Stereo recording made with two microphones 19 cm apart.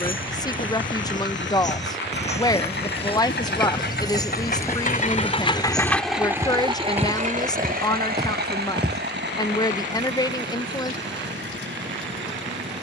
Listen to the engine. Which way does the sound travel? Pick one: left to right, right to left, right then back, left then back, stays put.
left to right.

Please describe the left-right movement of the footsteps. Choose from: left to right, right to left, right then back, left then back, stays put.
left to right.